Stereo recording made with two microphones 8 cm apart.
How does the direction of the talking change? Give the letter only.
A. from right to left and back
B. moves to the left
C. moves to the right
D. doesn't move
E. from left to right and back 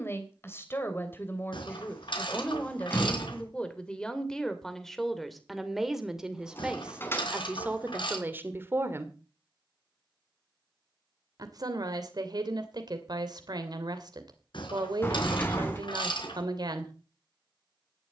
C.